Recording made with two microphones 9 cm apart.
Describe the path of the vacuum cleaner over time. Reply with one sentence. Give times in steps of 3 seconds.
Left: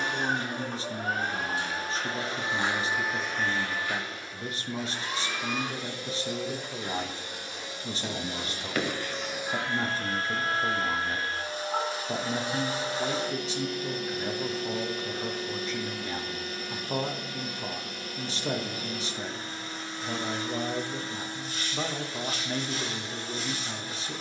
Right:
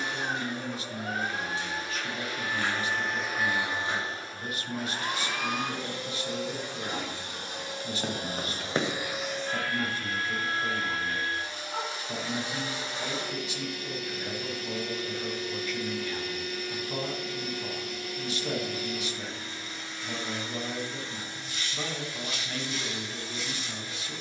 In this clip you hear the vacuum cleaner on the left from 0 s, on the right from 3 s and on the left from 9 s.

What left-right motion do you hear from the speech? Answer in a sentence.
You can hear the speech stay put.